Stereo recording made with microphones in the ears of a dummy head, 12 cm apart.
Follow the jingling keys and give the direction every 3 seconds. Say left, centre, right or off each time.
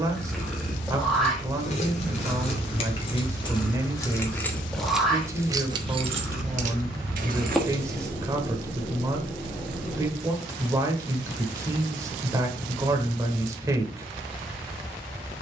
left, centre, right, off, off.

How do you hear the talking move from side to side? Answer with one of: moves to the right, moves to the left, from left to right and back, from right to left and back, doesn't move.
doesn't move.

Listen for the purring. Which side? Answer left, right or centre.
centre.